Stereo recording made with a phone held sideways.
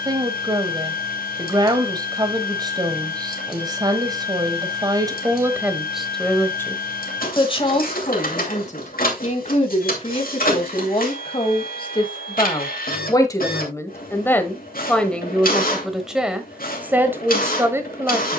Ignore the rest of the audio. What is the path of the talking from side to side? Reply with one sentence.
You can hear the talking go left and come back.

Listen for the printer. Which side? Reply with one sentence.
In this clip you hear the printer on the left.